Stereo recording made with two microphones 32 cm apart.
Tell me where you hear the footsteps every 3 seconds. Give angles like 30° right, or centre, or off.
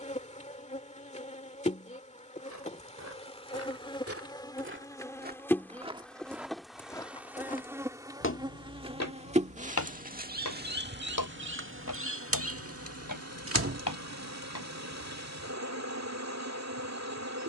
60° right, 40° right, 20° left, 60° left, 80° left, off.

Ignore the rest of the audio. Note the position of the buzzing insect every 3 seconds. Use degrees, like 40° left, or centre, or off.
20° left, 10° left, 10° right, 30° right, 50° right, 50° right.